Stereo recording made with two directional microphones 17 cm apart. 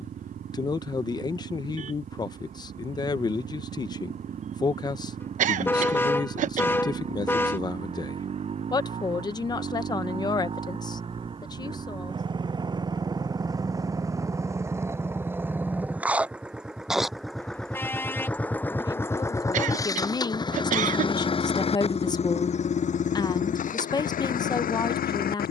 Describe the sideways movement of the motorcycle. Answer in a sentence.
In this clip you hear the motorcycle travel towards the left.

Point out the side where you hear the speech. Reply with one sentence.
You can hear the speech on the left.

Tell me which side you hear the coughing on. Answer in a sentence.
You can hear the coughing on the right.